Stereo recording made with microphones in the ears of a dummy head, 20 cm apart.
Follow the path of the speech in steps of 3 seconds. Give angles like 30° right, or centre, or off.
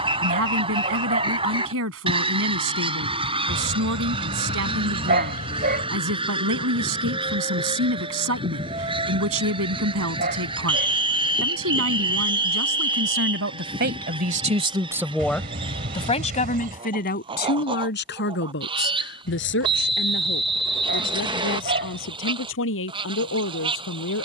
70° right, 70° right, 70° right, 70° right, 50° right, 30° left, 60° left, 70° left.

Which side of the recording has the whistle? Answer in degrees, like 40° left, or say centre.
20° right.